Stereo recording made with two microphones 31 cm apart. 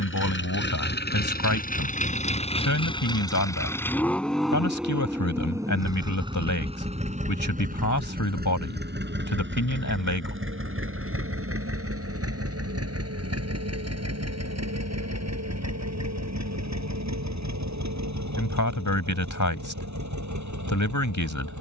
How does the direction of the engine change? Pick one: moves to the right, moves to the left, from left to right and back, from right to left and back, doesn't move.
moves to the right.